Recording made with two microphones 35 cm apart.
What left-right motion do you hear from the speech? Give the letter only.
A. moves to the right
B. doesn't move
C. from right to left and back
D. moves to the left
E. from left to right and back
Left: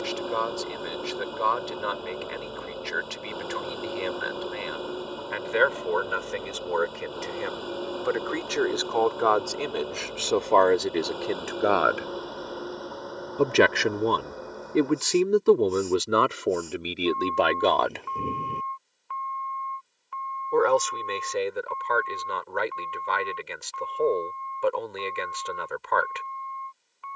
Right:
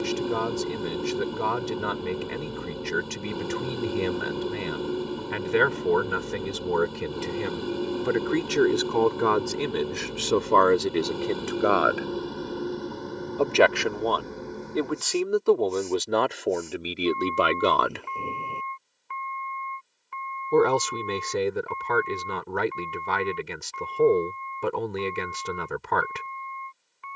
C.